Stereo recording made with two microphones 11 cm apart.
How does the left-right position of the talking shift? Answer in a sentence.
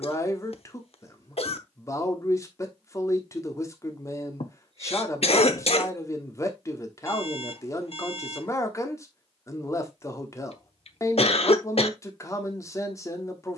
In this clip you hear the talking stay put.